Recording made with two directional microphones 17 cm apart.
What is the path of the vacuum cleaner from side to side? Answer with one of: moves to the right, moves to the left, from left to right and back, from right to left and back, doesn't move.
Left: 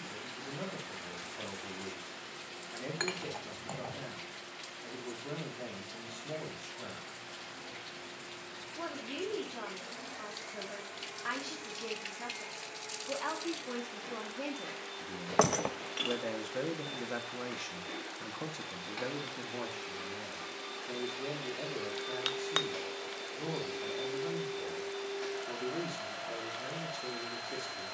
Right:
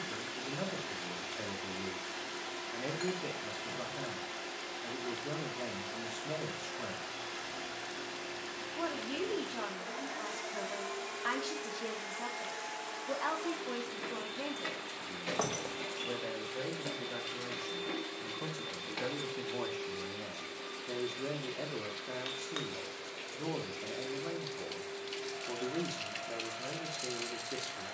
moves to the left.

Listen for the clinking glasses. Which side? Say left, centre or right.
left.